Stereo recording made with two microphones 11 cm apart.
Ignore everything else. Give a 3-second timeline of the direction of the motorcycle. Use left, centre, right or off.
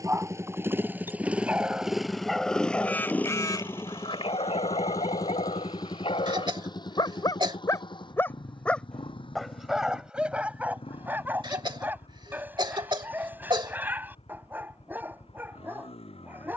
centre, left, left, left, left, left.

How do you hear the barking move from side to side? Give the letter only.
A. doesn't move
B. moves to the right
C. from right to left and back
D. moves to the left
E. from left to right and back
C.